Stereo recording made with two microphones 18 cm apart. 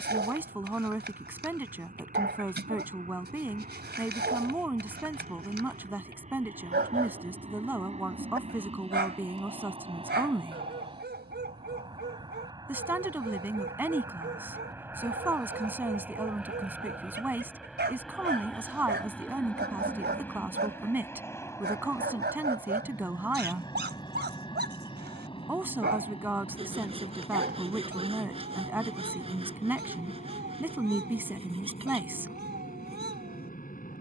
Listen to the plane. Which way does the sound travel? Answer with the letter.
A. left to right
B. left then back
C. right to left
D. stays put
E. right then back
C.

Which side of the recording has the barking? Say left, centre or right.
right.